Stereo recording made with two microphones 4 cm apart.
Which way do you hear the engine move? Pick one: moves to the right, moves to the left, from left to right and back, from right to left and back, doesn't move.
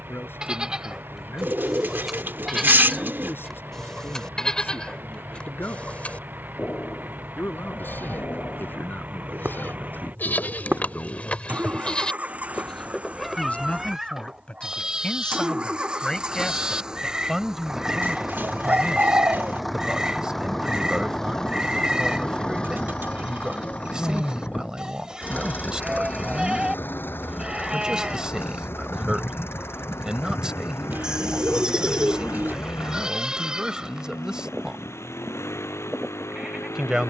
moves to the left.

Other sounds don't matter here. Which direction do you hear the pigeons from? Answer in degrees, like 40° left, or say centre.
50° right.